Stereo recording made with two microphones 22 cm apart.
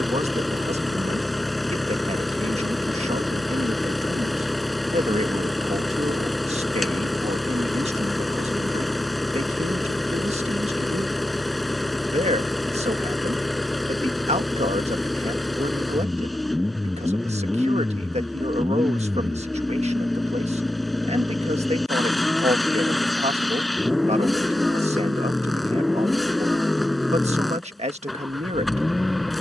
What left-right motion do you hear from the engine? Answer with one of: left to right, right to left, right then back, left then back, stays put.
stays put.